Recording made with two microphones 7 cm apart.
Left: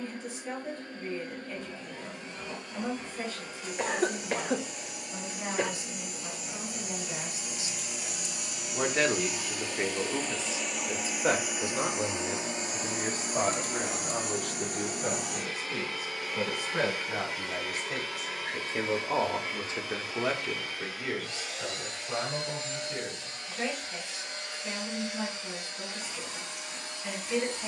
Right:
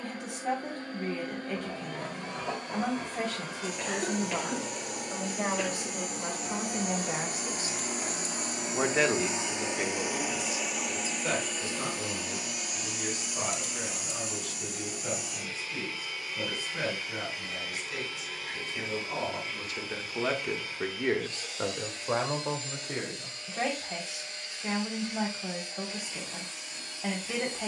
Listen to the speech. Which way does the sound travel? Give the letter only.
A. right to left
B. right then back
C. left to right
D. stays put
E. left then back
E.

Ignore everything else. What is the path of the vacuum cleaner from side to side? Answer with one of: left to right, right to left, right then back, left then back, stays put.
right to left.